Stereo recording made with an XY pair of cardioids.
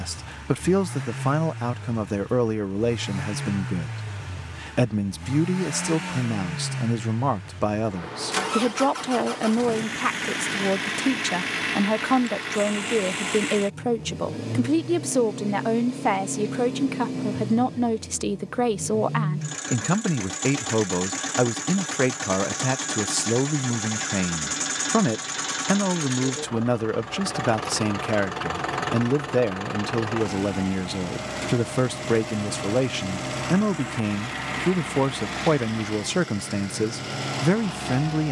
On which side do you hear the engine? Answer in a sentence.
In this clip you hear the engine in the centre.